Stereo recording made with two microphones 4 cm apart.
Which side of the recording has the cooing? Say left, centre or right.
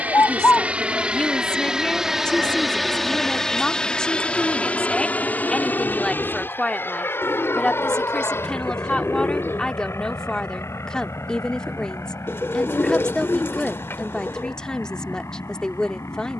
left.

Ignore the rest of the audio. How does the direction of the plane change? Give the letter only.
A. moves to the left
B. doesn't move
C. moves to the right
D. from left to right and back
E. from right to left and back
A.